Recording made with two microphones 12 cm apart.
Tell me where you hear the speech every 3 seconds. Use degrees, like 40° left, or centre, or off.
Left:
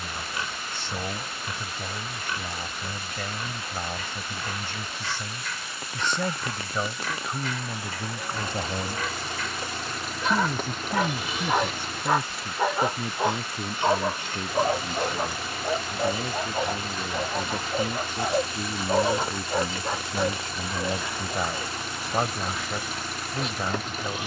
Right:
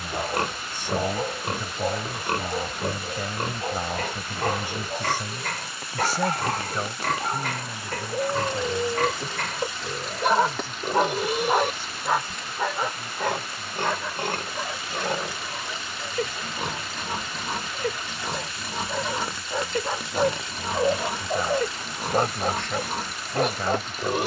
10° right, 10° right, 20° left, 60° left, 70° left, 70° left, 50° left, 10° left.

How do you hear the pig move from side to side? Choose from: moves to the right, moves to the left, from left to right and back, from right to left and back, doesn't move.
doesn't move.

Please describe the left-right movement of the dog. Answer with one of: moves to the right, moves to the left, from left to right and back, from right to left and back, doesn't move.
from right to left and back.